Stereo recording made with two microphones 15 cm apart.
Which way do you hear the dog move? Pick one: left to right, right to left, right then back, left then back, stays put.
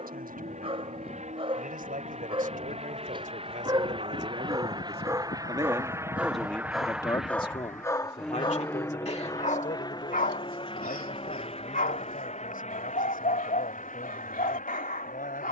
right to left.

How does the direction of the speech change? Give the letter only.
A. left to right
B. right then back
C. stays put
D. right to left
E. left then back
D.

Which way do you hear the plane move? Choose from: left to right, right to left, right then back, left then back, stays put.
right to left.